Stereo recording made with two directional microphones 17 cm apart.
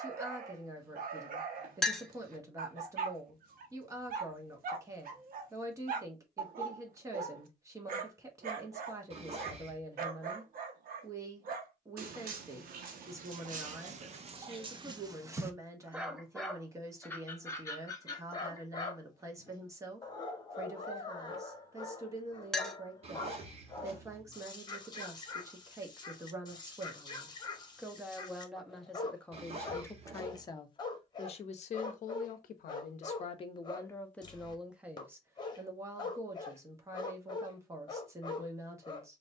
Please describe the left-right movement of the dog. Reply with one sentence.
You can hear the dog move to the left.